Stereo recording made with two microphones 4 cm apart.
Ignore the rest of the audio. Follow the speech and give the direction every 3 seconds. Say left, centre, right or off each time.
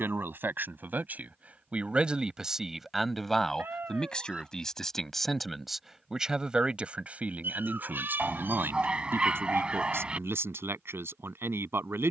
right, centre, right, right.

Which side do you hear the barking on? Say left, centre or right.
right.